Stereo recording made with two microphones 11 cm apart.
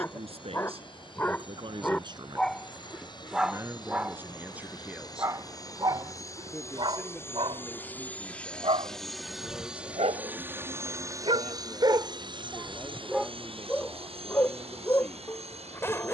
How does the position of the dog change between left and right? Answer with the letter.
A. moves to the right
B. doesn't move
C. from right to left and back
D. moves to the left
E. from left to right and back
E.